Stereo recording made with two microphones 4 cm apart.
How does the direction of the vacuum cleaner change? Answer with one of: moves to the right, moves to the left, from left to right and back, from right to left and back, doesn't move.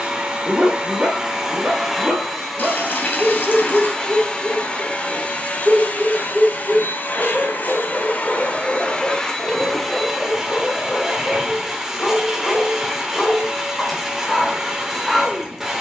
from right to left and back.